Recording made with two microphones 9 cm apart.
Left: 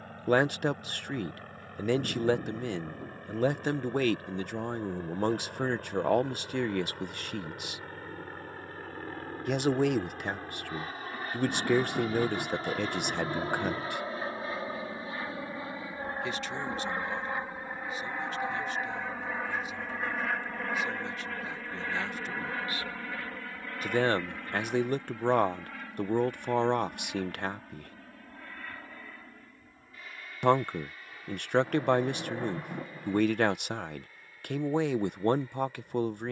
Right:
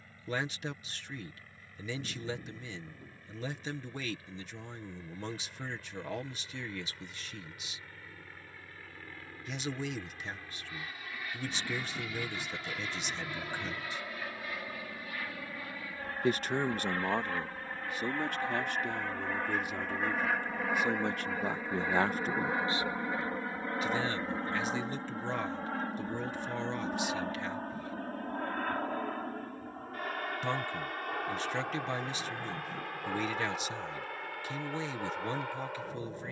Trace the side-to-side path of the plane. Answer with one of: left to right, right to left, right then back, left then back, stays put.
left to right.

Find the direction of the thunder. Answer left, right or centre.
left.